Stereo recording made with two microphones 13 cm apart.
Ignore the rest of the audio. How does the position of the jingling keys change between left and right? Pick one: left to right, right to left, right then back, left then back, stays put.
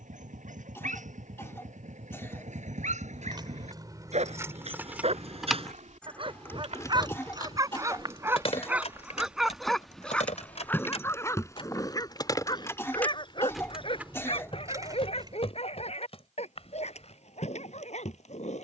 left then back.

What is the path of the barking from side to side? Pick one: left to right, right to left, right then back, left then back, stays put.
right to left.